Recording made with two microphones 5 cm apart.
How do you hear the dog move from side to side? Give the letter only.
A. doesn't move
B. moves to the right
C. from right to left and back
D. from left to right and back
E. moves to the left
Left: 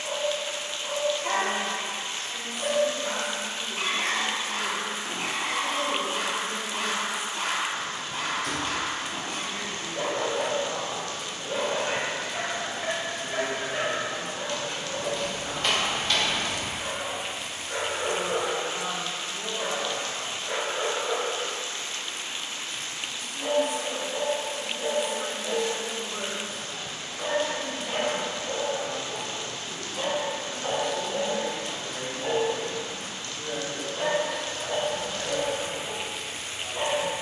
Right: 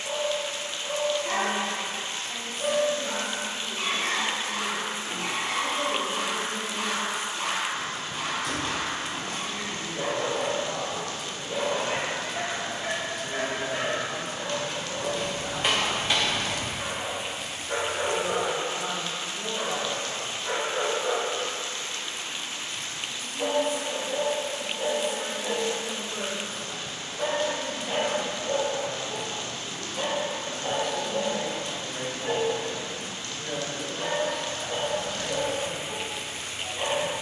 D.